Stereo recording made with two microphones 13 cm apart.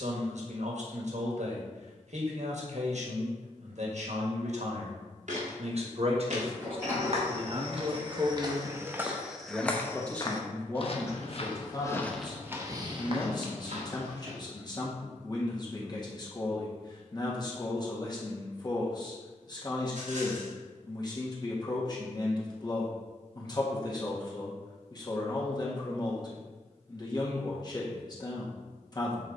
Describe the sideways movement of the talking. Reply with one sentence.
You can hear the talking go from the right side to the left.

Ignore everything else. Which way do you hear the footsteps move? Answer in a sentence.
You can hear the footsteps go left and come back.